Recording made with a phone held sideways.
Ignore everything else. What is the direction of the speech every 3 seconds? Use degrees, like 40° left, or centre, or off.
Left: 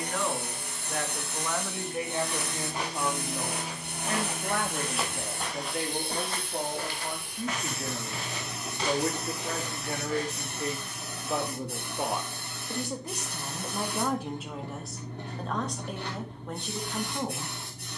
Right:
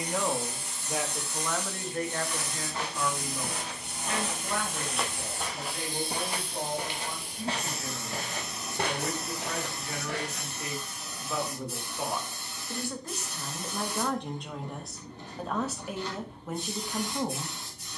centre, 50° left, 60° left, 40° left, 10° left, centre.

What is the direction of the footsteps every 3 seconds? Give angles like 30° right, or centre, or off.
20° left, 10° left, 30° right, 70° right, off, off.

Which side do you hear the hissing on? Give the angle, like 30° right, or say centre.
60° left.